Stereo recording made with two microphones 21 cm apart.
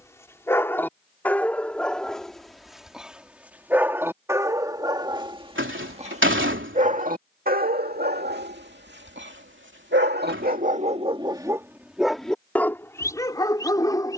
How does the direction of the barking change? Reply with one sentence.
In this clip you hear the barking move from left to right and back again.